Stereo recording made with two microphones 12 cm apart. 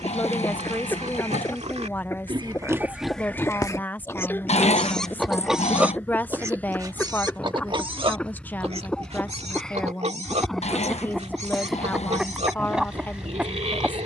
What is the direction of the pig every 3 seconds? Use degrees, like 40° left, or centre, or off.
50° right, 10° left, 40° right, 60° right, 60° right.